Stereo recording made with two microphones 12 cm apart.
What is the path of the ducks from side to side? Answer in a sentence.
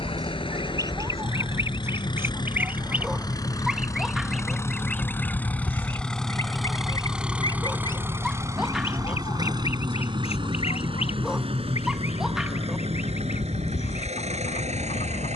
You can hear the ducks travel towards the left.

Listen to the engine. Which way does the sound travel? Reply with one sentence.
You can hear the engine travel towards the right.